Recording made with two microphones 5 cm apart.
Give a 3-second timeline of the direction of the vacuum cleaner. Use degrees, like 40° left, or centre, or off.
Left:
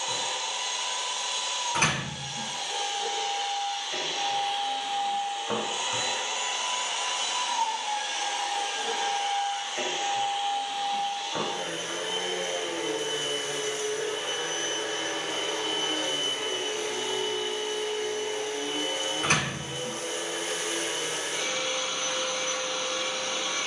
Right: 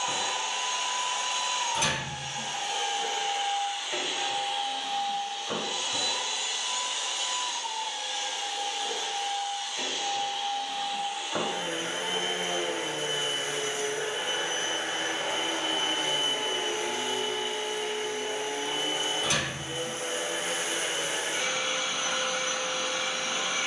30° right, centre, 50° left, 10° left, 30° right, 30° right, 30° right, 30° right.